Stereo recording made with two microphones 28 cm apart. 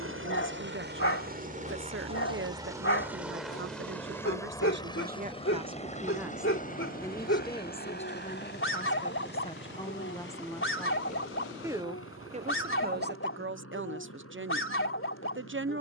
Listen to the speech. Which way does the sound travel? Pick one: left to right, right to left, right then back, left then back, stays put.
left then back.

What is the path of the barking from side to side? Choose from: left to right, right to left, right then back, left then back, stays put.
stays put.